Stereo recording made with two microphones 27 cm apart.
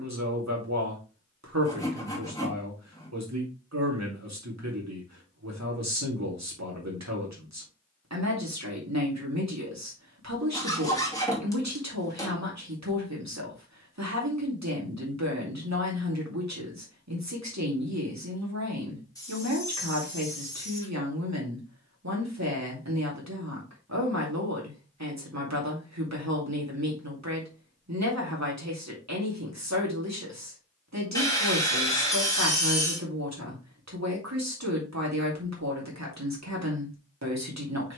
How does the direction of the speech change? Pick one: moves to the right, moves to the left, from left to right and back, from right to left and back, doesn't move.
doesn't move.